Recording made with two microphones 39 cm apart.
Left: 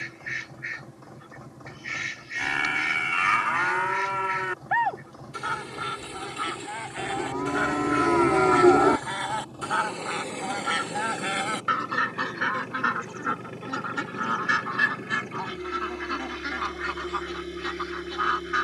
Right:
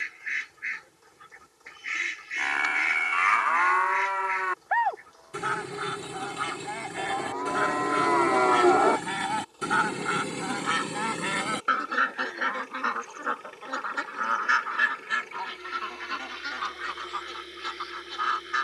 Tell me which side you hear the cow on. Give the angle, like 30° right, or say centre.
40° left.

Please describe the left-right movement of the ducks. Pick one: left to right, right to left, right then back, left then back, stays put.
right to left.